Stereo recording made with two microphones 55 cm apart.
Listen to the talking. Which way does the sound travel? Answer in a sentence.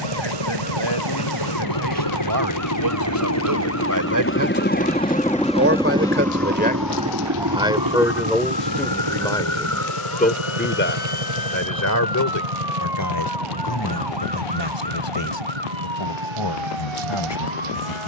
In this clip you hear the talking go from the right side to the left.